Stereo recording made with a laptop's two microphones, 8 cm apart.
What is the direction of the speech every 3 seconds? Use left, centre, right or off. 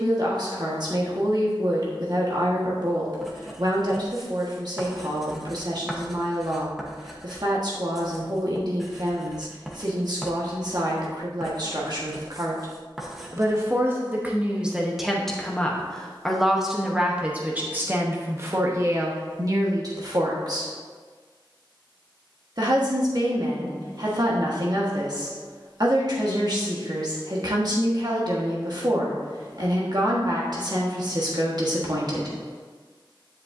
right, right, right, right, right, centre, right, right, right, right, right.